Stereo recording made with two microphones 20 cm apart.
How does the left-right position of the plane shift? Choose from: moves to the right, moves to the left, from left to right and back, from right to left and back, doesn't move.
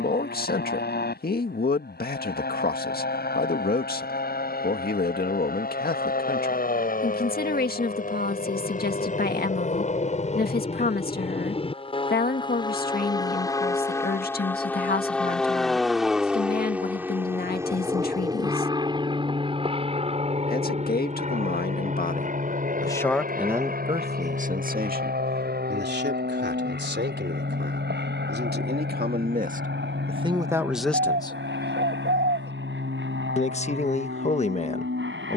moves to the right.